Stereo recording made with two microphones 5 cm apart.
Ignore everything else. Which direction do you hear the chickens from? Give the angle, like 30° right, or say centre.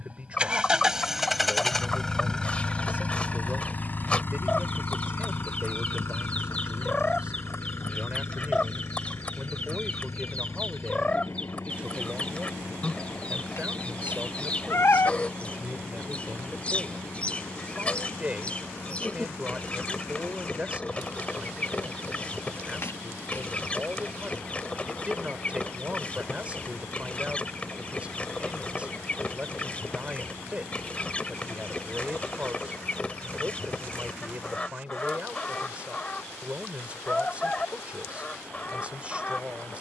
20° left.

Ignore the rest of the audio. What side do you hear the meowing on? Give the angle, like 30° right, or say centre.
60° left.